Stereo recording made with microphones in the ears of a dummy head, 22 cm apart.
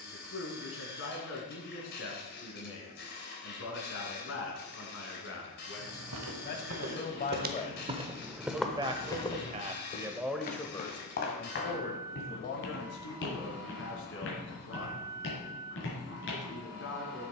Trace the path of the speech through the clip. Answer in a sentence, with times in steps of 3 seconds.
In this clip you hear the speech on the left from 0 s, in the centre from 9 s and on the left from 12 s.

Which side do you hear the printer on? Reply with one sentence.
You can hear the printer on the left.